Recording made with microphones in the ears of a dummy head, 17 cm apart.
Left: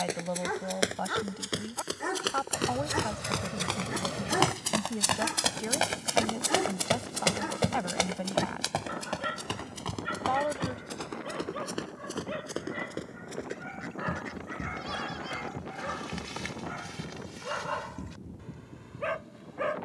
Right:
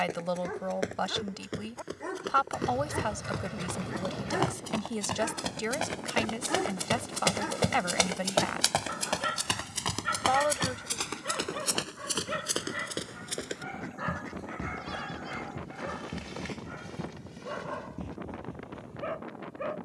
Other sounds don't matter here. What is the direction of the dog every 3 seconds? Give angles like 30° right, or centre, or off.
40° left, 20° left, centre, 30° right, 20° right, 20° left, 50° left.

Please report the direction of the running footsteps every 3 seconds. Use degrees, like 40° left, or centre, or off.
70° left, 50° left, 10° right, 50° right, 70° right, 70° right, 80° right.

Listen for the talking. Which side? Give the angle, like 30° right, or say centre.
50° right.